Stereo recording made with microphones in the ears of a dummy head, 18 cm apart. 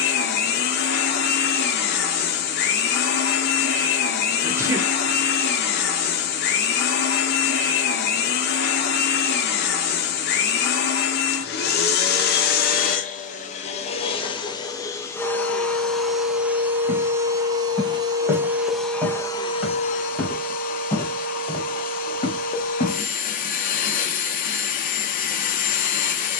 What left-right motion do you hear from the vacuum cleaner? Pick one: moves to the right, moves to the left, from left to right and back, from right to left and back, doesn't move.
from left to right and back.